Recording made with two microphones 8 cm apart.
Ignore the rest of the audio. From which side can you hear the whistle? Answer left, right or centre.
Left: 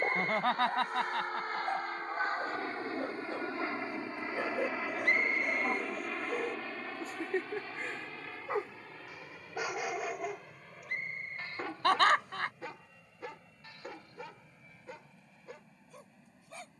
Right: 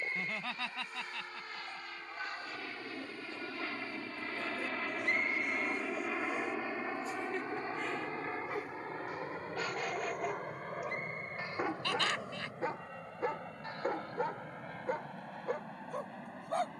left.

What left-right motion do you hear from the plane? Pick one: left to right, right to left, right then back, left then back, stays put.
left to right.